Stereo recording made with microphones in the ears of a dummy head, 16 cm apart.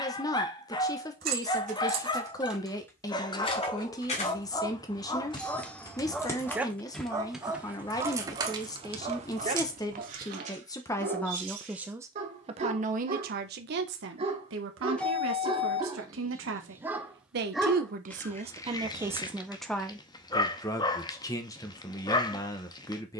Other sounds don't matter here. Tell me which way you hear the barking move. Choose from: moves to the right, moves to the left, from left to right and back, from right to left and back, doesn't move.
from left to right and back.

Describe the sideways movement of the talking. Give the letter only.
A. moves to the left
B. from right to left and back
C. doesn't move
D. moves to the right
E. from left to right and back
E.